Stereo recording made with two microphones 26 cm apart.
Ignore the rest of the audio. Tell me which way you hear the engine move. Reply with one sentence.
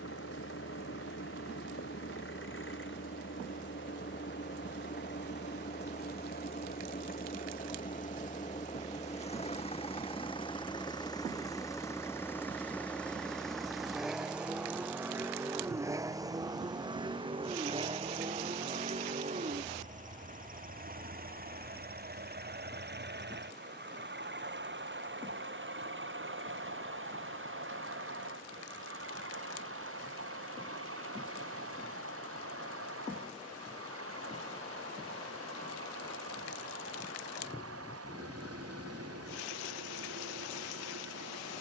You can hear the engine go from the left side to the right.